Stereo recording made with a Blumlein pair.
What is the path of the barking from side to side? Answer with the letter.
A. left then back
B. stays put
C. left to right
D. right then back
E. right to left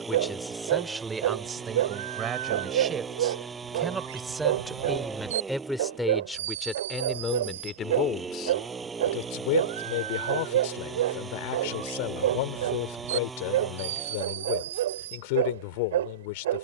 B.